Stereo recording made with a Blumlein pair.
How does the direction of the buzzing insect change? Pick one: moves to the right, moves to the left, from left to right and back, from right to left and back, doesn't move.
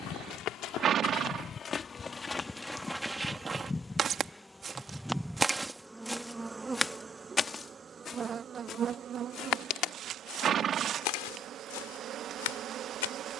moves to the right.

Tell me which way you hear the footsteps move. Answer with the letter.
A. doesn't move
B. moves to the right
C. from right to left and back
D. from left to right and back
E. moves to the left
D.